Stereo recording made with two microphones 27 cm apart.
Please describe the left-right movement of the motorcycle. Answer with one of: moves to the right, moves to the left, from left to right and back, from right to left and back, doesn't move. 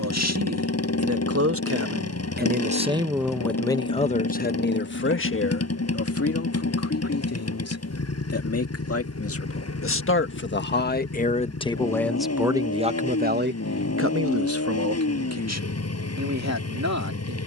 doesn't move.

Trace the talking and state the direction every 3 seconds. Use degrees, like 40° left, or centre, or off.
50° right, 30° left, 60° left, 40° left, 40° right, 70° right.